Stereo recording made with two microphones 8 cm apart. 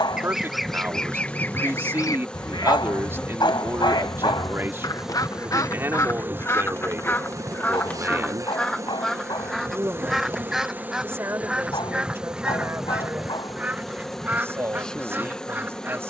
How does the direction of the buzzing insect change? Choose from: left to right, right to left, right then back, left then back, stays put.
right then back.